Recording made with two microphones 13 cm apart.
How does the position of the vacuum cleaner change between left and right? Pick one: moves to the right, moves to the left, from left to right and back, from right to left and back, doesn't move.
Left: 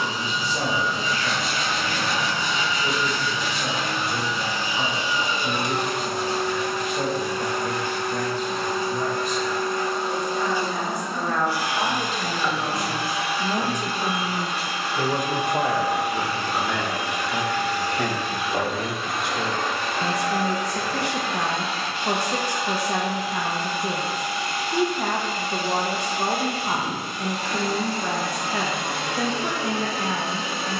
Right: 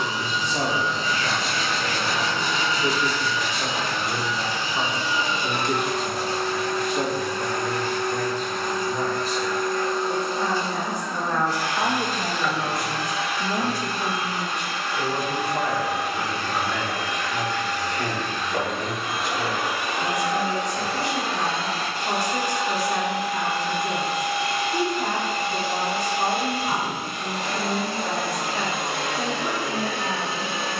moves to the right.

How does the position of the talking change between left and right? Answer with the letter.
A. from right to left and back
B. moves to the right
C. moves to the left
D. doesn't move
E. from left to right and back
C.